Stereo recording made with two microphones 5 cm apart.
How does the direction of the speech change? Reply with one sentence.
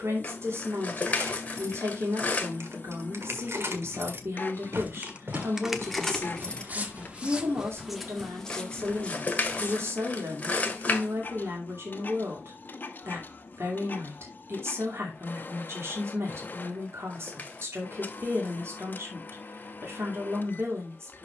You can hear the speech stay in one place.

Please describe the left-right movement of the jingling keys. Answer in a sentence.
In this clip you hear the jingling keys move from right to left.